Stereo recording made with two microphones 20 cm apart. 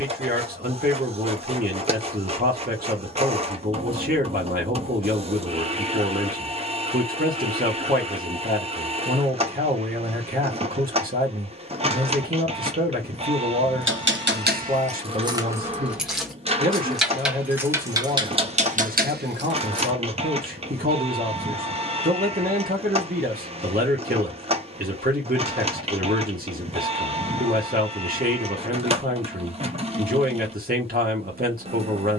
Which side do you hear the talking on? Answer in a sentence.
You can hear the talking on the right.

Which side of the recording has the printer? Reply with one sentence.
In this clip you hear the printer on the right.